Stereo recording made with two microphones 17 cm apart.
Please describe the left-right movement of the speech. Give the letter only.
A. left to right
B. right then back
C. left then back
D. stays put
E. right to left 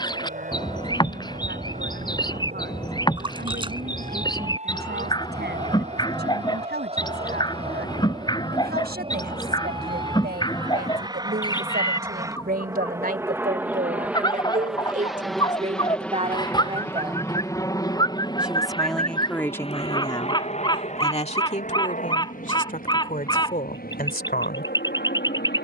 E.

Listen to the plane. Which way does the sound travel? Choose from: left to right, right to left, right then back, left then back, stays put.
right to left.